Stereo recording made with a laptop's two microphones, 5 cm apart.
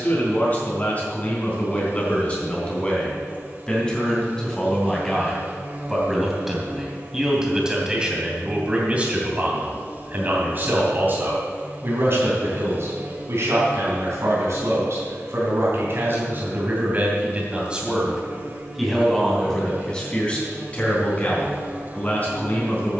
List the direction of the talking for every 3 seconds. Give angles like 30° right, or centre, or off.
30° left, 10° left, 10° right, 40° right, 60° right, 40° right, 10° left, 30° left.